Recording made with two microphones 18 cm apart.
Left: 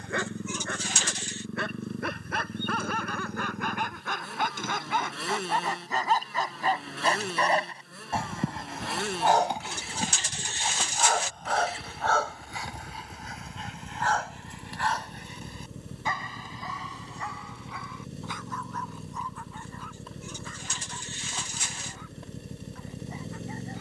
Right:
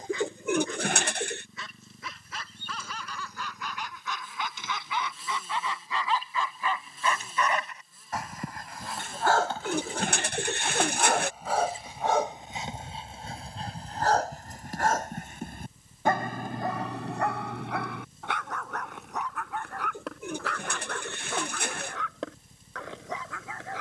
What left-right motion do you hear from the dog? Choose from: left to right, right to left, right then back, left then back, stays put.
left to right.